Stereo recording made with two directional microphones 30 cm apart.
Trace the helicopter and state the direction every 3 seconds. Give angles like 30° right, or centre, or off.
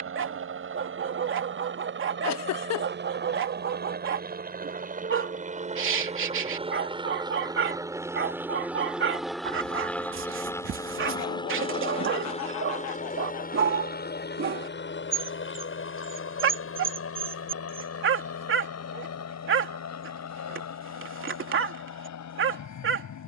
40° right, 30° right, 10° right, 10° left, 30° left, 40° left, 50° left, 60° left.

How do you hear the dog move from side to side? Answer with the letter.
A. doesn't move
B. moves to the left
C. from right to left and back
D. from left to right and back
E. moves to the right
A.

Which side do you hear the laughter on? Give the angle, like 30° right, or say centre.
60° left.